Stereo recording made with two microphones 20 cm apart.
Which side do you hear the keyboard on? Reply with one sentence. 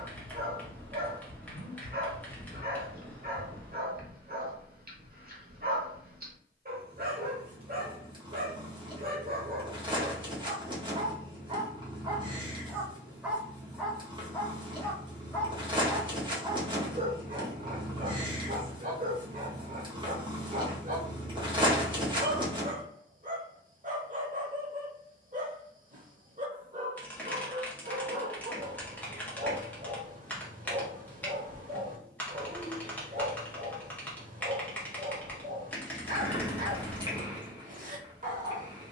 You can hear the keyboard in the centre.